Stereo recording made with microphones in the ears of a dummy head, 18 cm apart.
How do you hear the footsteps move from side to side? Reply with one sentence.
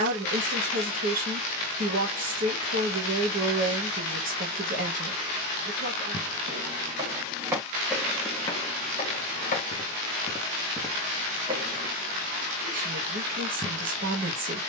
In this clip you hear the footsteps go left and come back.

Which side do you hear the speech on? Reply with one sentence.
You can hear the speech on the right.